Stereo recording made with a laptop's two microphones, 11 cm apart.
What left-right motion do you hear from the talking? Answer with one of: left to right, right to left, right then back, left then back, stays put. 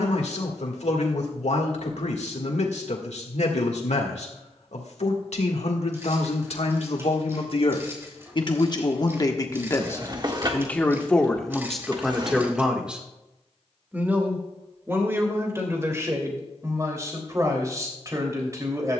left to right.